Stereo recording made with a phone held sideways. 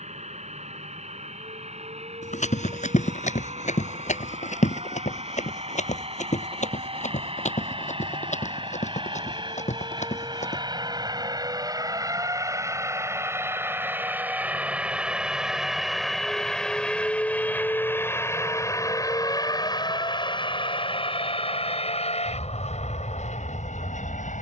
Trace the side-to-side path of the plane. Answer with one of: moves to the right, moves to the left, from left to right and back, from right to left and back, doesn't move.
moves to the left.